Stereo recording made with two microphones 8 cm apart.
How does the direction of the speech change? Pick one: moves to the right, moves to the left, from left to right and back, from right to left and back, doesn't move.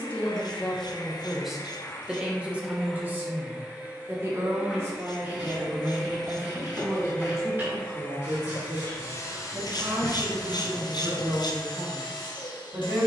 moves to the right.